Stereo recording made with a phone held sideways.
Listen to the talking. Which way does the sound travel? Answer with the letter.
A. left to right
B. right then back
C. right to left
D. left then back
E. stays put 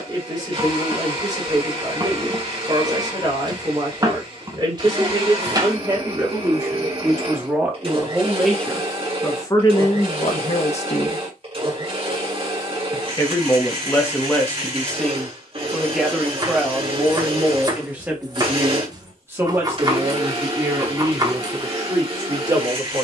D.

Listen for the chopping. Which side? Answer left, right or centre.
right.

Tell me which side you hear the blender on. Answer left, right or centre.
right.